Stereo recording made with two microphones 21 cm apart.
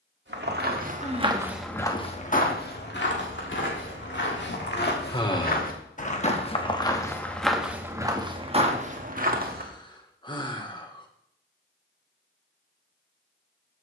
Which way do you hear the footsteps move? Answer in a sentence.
You can hear the footsteps move from right to left and back again.